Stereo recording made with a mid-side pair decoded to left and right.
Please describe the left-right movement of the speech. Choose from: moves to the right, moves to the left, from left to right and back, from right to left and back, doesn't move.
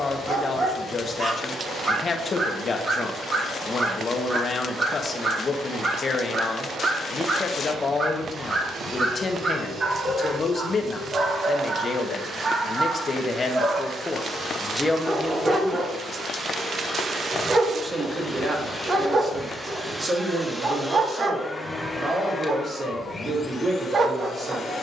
moves to the right.